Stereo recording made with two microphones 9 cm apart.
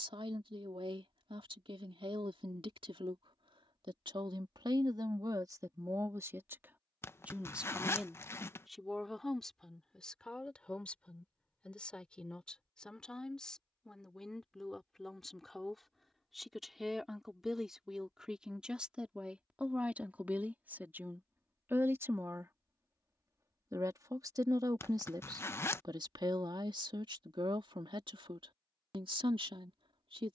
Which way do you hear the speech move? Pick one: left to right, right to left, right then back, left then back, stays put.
left then back.